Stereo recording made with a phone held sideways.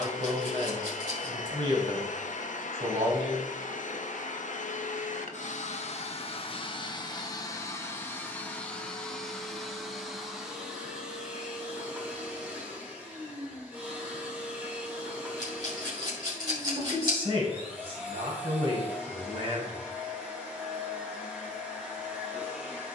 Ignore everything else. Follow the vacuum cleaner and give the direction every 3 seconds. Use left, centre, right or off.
left, left, left, centre, centre, centre, centre, centre.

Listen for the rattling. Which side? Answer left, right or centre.
right.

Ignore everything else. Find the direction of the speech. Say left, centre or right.
right.